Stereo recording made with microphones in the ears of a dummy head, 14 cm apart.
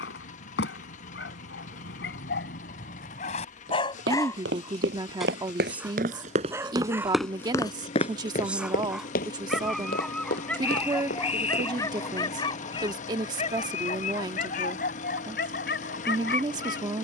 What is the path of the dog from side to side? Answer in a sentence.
In this clip you hear the dog go right and come back.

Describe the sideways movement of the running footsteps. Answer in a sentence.
In this clip you hear the running footsteps travel towards the left.